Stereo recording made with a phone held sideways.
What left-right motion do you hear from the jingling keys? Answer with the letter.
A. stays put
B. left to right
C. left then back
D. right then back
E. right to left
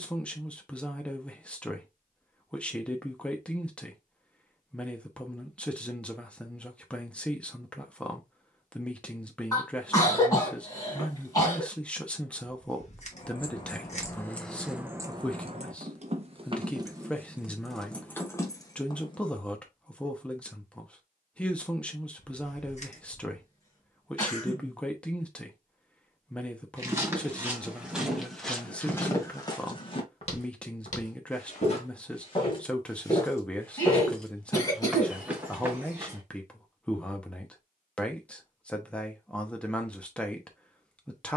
D.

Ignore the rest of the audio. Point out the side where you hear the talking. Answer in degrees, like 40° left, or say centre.
10° left.